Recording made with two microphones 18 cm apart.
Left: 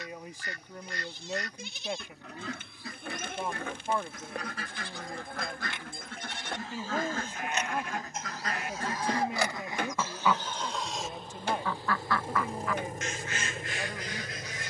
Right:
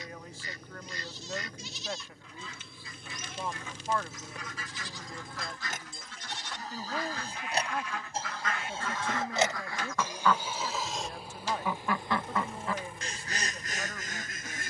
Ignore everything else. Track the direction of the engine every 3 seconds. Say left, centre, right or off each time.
right, right, right, centre, left.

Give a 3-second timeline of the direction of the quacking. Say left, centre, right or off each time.
left, left, left, centre, right.